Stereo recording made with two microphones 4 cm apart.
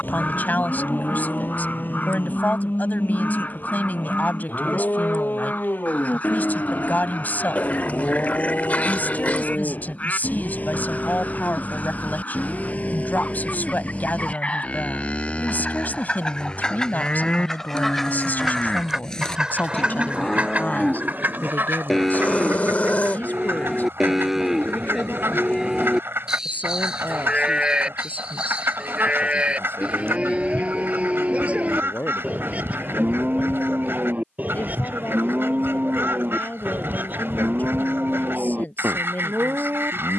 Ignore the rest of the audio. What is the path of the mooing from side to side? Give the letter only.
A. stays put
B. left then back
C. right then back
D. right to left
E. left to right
E.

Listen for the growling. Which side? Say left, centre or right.
left.